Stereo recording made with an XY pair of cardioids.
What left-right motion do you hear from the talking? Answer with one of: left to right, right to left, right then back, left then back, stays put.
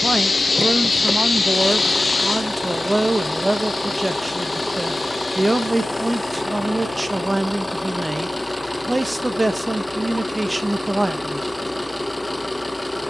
stays put.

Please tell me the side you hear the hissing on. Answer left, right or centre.
left.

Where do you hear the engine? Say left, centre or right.
centre.